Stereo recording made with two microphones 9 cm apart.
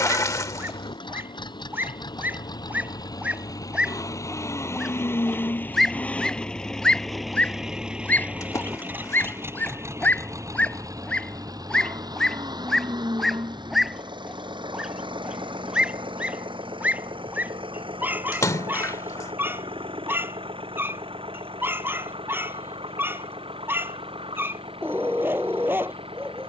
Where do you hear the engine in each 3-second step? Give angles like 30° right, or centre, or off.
50° left, 30° left, centre, 30° right, 50° right, 60° right, 70° right, 70° right, 70° right.